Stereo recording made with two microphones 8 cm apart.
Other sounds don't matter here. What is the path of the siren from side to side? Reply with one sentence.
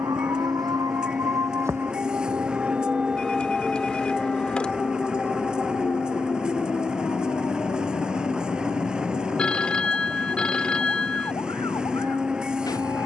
In this clip you hear the siren go from the right side to the left.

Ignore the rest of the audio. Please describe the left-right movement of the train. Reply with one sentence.
In this clip you hear the train stay put.